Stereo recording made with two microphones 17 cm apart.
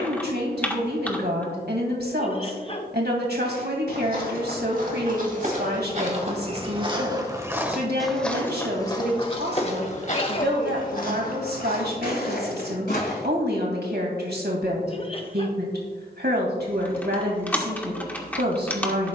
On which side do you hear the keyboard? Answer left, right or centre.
centre.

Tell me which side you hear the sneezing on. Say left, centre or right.
left.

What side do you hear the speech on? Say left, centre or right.
right.